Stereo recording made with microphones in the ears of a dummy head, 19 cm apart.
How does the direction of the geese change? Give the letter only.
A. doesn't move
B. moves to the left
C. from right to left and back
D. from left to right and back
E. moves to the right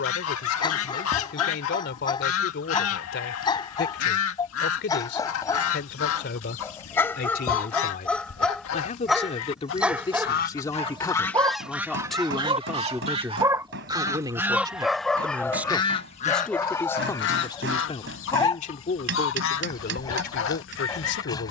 D.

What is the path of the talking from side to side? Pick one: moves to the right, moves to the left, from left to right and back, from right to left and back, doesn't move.
from left to right and back.